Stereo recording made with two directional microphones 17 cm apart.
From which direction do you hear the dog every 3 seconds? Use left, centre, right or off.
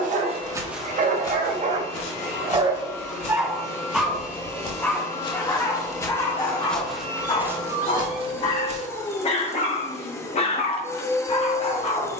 right, centre, left, left.